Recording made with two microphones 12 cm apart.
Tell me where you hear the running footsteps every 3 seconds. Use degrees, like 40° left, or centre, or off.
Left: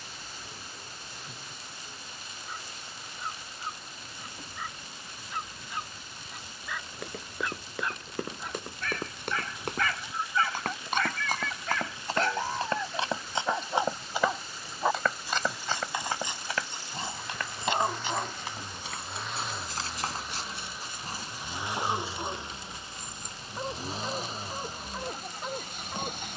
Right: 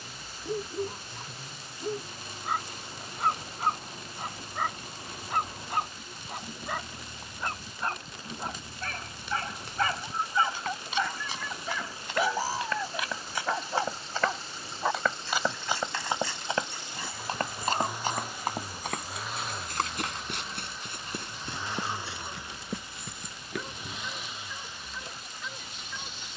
off, off, 60° left, 50° left, 20° left, 20° right, 50° right, 60° right, off.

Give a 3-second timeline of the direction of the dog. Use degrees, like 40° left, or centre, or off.
70° right, 60° right, 40° right, 20° right, centre, 20° left, 30° left, 40° left, 40° left.